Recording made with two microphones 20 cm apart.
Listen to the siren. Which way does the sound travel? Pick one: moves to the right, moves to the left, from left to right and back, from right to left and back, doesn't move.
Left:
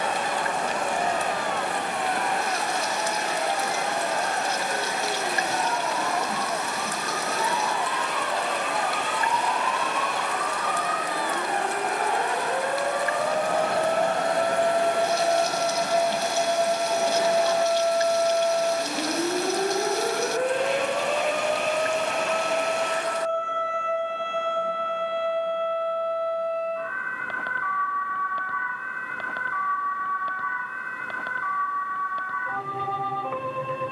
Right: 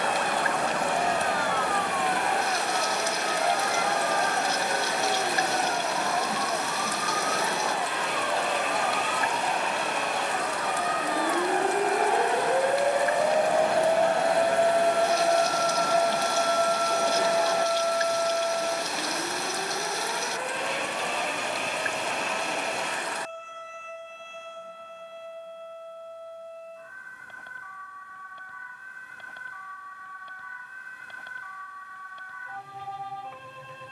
moves to the left.